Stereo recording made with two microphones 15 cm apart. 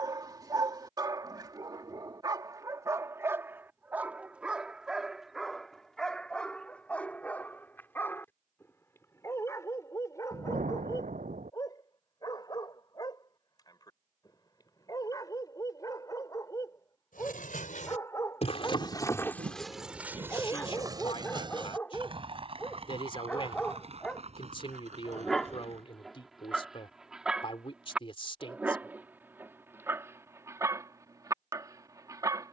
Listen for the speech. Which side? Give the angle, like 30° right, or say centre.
40° left.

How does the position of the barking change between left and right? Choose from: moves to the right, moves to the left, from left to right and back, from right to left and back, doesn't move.
from right to left and back.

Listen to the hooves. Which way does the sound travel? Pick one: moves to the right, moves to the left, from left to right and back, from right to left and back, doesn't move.
moves to the right.